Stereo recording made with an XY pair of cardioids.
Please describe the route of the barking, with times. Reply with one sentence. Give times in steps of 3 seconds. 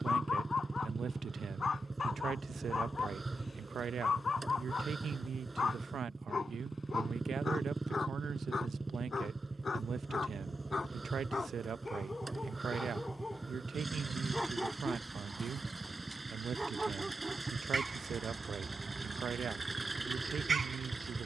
In this clip you hear the barking on the left from 0 s, in the centre from 12 s and on the right from 18 s.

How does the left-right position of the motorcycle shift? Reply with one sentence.
You can hear the motorcycle stay in one place.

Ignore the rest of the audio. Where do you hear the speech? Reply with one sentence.
You can hear the speech on the right.